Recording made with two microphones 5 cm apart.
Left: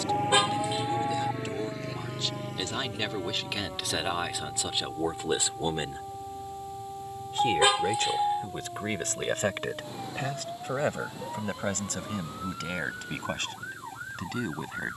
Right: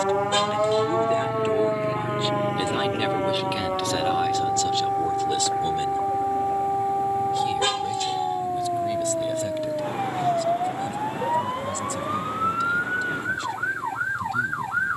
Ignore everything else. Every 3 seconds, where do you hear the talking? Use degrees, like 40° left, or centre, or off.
30° right, 10° left, 40° left, 60° left, 60° left.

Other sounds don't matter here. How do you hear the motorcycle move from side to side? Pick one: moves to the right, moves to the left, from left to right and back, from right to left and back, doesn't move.
moves to the right.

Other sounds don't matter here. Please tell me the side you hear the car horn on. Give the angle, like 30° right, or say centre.
10° left.